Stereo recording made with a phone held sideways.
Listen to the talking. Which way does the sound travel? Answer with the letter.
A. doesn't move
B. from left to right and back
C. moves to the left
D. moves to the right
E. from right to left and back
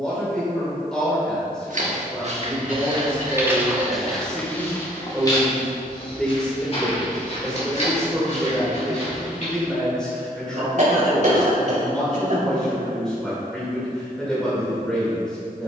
A.